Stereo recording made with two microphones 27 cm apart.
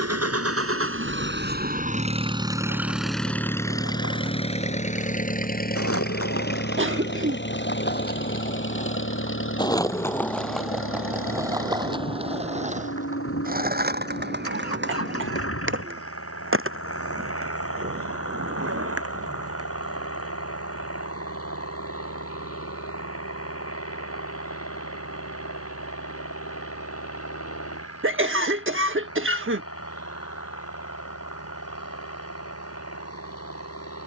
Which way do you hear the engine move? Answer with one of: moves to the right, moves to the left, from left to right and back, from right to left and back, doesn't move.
moves to the left.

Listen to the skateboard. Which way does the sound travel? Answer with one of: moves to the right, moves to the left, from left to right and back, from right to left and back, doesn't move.
moves to the right.